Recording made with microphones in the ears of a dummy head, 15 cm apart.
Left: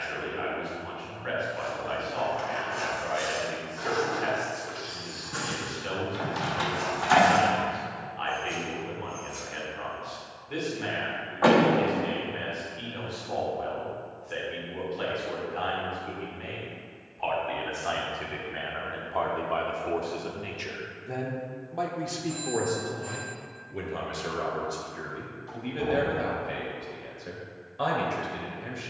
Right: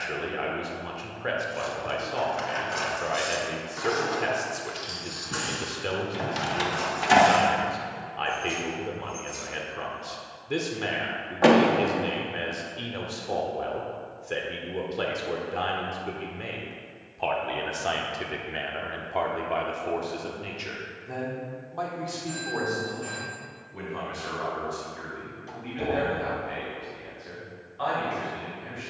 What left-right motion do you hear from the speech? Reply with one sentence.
In this clip you hear the speech move from right to left.